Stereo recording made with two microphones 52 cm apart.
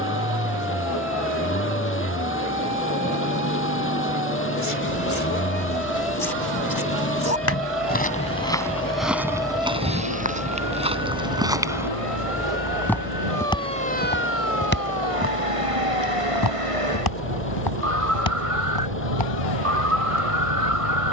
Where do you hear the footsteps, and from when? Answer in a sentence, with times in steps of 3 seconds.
In this clip you hear the footsteps not at all from 0 s, on the left from 3 s, in the centre from 9 s and on the left from 15 s.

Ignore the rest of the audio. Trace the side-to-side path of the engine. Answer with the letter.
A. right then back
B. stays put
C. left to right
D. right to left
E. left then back
B.